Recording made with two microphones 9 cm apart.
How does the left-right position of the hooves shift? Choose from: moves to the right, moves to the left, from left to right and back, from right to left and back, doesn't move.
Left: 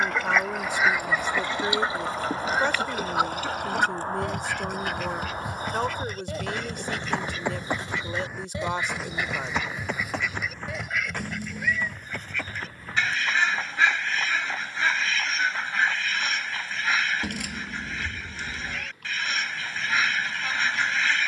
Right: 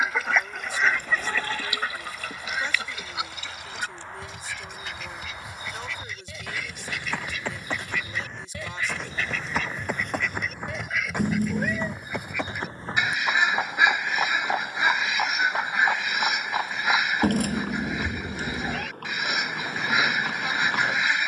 moves to the right.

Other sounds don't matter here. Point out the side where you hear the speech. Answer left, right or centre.
left.